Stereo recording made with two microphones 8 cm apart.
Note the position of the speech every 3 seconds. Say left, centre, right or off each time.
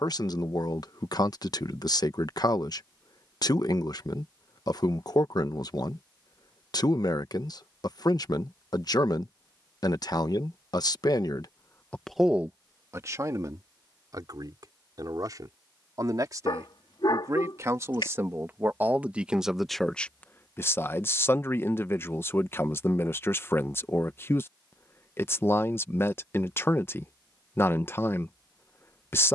left, left, left, left, right, right, centre, left, left, left.